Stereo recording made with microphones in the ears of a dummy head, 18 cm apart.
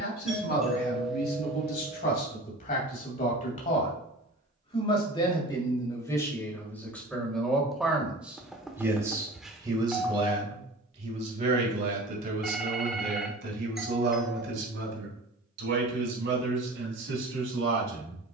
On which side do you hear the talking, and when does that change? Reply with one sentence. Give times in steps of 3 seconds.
In this clip you hear the talking on the left from 0 s, in the centre from 6 s and on the right from 9 s.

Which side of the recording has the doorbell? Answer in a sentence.
In this clip you hear the doorbell in the centre.